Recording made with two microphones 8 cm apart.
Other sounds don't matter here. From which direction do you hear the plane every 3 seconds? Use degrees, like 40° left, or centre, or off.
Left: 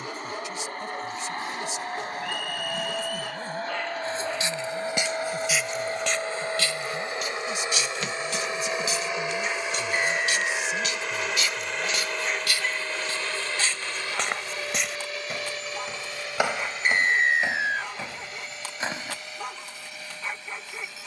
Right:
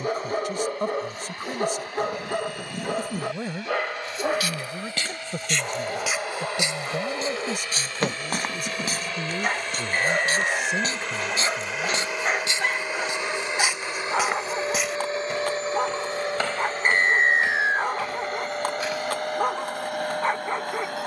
50° left, 40° left, 30° left, 10° left, 20° right, 40° right, 50° right.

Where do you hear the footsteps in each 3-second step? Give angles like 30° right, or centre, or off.
off, 20° left, 40° right, 40° right, 10° right, 20° left, 30° left.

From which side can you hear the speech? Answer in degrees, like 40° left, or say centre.
60° right.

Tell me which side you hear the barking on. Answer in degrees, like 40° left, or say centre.
50° right.